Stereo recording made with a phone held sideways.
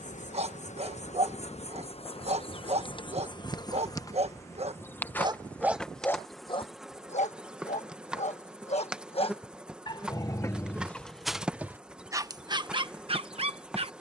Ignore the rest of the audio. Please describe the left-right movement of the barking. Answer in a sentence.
In this clip you hear the barking move from right to left and back again.